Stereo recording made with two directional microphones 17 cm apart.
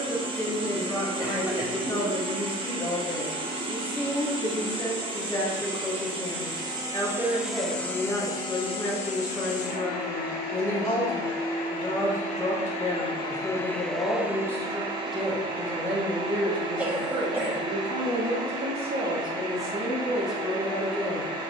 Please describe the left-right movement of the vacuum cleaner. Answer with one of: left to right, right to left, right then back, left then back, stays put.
left then back.